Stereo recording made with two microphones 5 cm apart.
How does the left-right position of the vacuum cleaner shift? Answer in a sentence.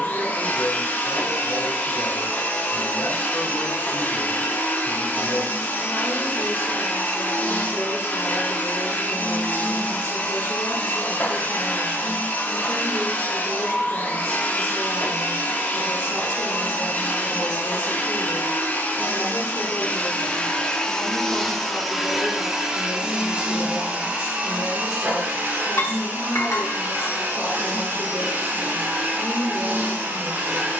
In this clip you hear the vacuum cleaner travel towards the right.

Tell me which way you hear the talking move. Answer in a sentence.
In this clip you hear the talking stay put.